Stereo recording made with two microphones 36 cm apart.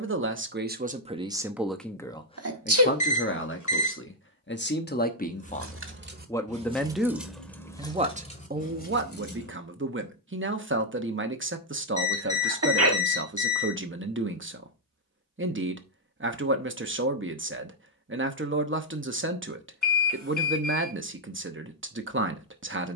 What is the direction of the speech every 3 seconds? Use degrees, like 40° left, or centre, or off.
10° right, 30° left, 10° right, 40° right, 40° right, 40° right, 40° right, 40° right.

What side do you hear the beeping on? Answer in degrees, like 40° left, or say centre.
60° left.